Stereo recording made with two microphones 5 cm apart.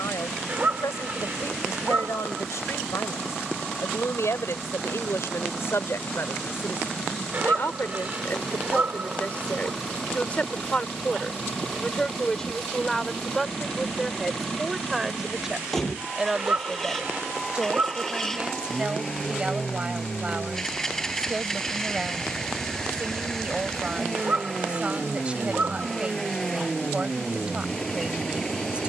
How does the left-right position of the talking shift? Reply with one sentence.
You can hear the talking move to the right.